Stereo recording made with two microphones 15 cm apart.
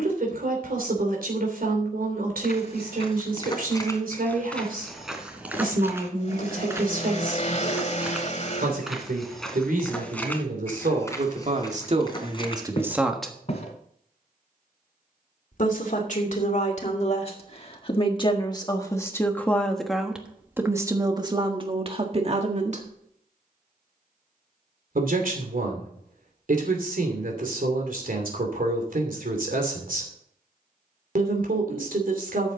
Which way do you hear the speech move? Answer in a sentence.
In this clip you hear the speech go left and come back.